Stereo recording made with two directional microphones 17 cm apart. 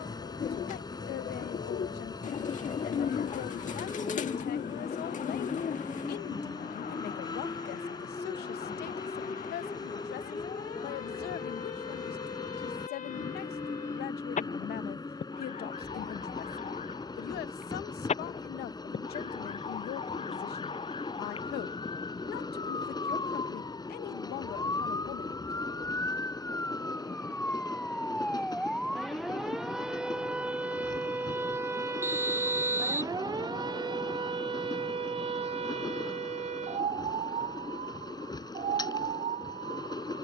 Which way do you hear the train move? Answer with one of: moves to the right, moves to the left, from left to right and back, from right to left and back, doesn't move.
doesn't move.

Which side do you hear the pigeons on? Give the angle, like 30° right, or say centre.
50° left.